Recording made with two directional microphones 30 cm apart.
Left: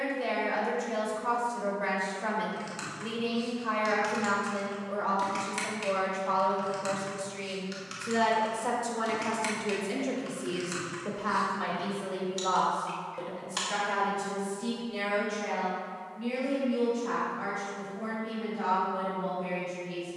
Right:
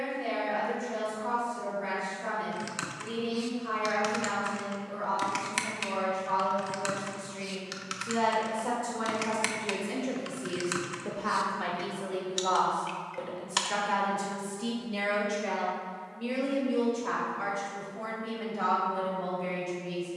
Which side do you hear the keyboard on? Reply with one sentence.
In this clip you hear the keyboard on the right.